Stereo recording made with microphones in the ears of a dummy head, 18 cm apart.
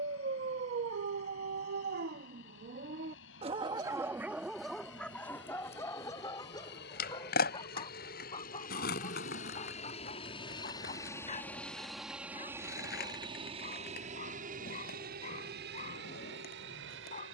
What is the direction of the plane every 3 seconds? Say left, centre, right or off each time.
left, left, left, left, right, right.